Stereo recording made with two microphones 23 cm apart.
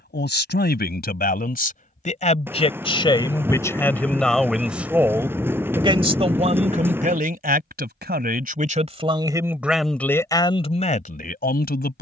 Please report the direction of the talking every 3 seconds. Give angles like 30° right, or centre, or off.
40° left, centre, 30° right, 20° left.